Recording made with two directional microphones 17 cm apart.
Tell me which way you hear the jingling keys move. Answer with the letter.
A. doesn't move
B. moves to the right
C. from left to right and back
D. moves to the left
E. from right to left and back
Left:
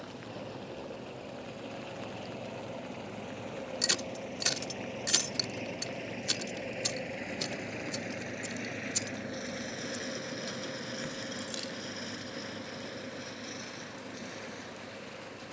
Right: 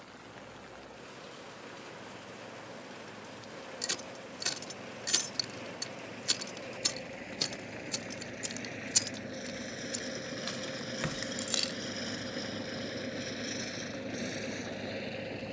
B.